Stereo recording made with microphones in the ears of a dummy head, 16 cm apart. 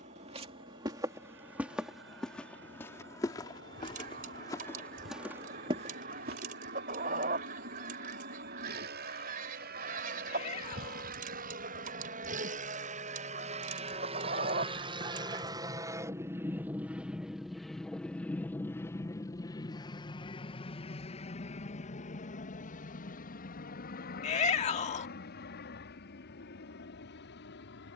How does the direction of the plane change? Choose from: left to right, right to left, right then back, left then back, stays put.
right to left.